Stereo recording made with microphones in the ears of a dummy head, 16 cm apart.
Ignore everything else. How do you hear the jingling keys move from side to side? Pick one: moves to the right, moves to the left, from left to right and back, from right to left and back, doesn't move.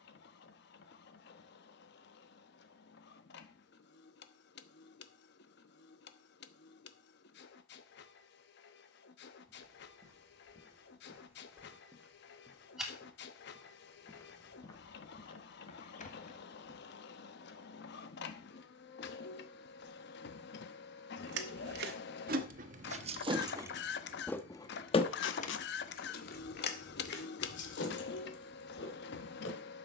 moves to the left.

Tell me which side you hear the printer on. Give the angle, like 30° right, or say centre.
60° left.